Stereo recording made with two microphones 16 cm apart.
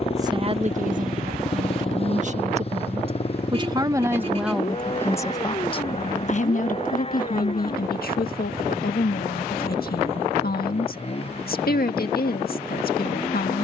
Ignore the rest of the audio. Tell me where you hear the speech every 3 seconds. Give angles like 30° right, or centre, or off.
40° right, centre, 60° left, 70° left, 70° left.